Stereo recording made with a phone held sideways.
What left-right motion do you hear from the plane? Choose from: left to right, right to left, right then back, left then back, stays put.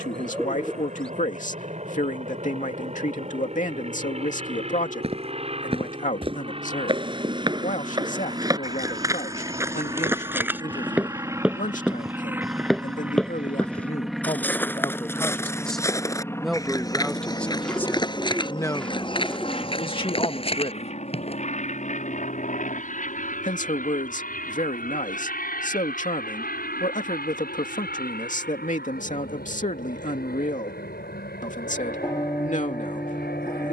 right to left.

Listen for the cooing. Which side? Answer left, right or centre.
centre.